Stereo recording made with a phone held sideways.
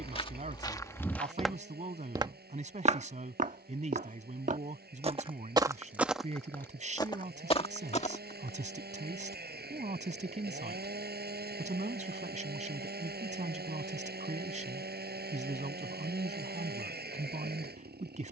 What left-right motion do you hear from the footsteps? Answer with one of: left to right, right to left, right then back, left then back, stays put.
right then back.